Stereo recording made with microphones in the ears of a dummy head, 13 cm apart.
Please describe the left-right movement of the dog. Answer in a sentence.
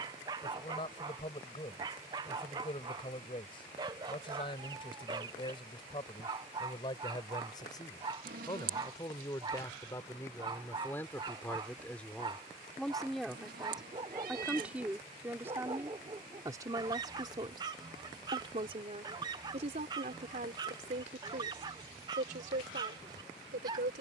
You can hear the dog stay put.